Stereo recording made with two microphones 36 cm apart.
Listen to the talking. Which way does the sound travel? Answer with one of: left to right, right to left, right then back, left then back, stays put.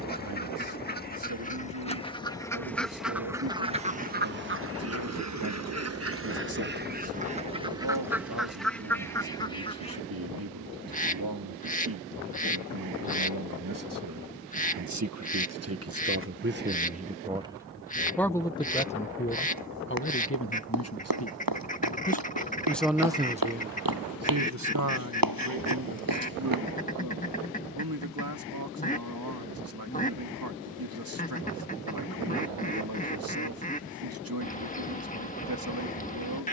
left then back.